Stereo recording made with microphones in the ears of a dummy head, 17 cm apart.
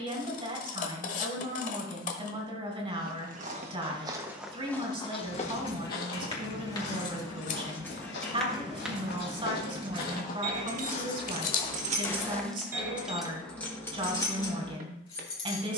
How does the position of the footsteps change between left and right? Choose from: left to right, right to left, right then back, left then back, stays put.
left then back.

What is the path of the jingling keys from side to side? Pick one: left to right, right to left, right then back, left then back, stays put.
right then back.